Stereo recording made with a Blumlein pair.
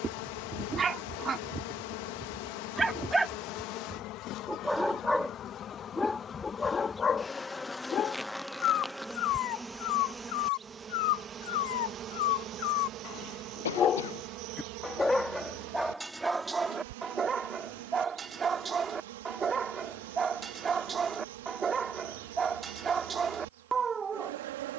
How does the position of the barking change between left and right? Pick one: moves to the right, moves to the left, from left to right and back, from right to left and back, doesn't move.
from right to left and back.